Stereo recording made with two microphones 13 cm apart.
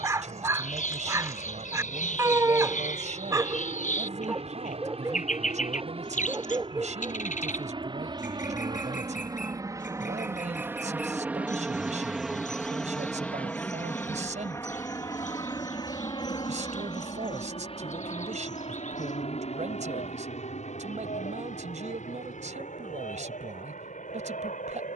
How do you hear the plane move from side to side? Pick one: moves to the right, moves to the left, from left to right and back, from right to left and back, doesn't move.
moves to the left.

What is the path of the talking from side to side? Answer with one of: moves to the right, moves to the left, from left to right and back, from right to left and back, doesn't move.
doesn't move.